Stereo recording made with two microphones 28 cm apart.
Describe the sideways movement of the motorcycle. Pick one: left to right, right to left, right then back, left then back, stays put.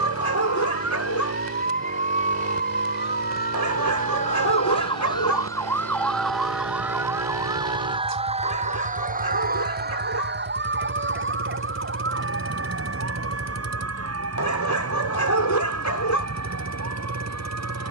stays put.